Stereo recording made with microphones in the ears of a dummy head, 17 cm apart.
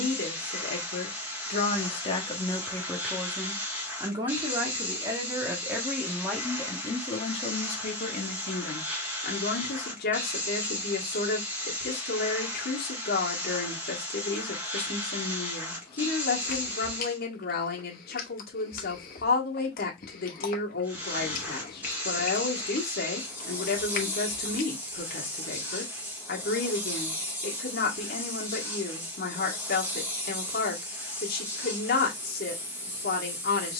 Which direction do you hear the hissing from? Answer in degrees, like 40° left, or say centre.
10° right.